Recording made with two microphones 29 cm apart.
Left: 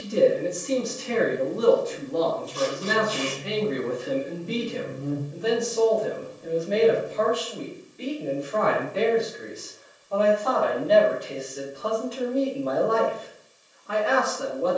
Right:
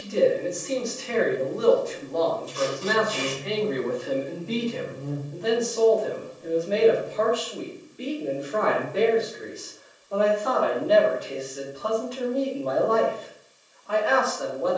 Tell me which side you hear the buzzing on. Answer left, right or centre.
left.